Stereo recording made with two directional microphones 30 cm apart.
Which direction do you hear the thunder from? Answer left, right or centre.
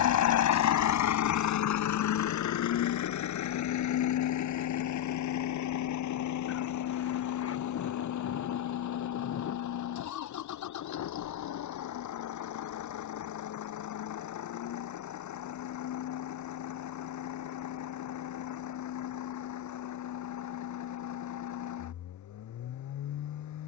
left.